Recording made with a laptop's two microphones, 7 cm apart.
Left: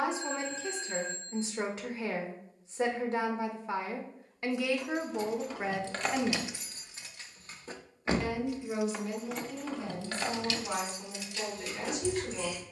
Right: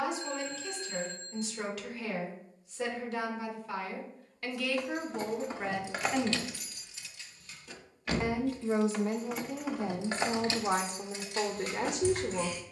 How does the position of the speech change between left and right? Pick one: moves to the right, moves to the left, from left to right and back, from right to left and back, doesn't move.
moves to the right.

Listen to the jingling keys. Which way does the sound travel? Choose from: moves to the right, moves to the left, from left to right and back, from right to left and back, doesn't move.
from right to left and back.